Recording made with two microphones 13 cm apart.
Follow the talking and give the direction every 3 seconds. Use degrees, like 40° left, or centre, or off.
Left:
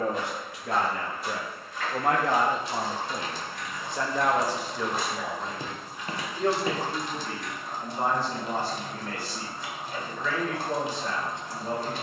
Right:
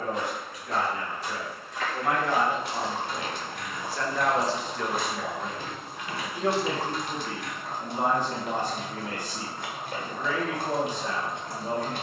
50° left, 10° left, 10° right, 20° right.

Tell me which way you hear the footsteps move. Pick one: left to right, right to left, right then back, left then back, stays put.
right to left.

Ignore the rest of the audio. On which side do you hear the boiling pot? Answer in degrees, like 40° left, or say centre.
50° right.